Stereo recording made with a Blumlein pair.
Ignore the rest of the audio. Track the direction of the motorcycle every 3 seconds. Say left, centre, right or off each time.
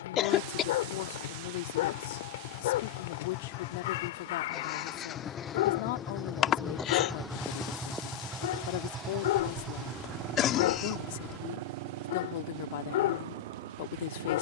left, left, centre, right, right.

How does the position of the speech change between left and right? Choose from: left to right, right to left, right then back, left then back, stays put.
stays put.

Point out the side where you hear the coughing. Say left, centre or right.
left.